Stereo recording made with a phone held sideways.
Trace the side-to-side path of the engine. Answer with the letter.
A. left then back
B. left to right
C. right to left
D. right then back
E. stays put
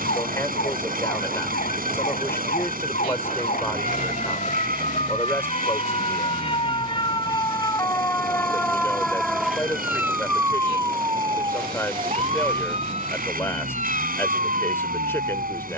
E.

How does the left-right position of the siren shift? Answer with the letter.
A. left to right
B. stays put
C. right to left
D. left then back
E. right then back
A.